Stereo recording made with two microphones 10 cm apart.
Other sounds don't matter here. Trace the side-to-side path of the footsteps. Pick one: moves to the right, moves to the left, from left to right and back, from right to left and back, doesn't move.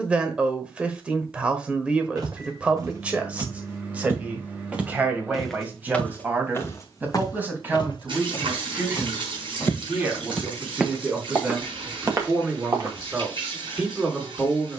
from right to left and back.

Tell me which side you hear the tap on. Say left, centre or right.
right.